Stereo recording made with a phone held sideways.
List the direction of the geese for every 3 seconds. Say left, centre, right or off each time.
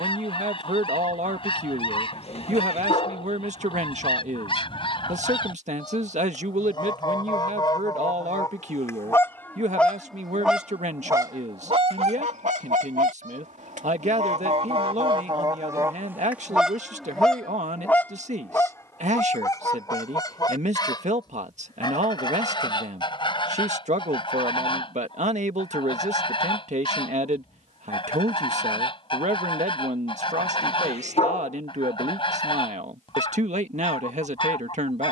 left, left, left, centre, right, centre, left, left, left, left, left, left.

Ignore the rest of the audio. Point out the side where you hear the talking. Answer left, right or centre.
right.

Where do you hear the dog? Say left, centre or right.
left.